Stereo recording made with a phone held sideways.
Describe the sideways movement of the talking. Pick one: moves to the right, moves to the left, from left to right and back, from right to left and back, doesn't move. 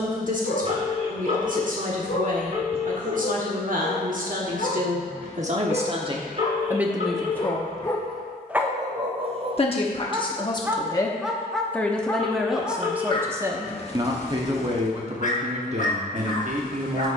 from right to left and back.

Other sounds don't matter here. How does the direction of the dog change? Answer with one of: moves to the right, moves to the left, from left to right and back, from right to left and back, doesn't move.
from left to right and back.